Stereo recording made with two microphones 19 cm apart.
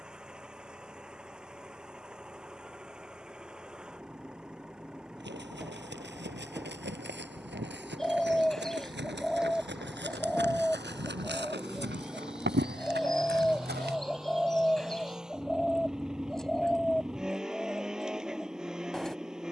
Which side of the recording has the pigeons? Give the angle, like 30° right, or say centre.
centre.